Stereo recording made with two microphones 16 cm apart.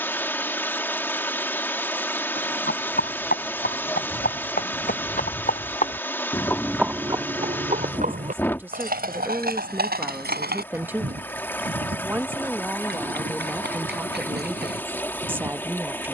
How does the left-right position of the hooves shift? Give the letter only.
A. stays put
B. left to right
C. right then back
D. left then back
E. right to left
B.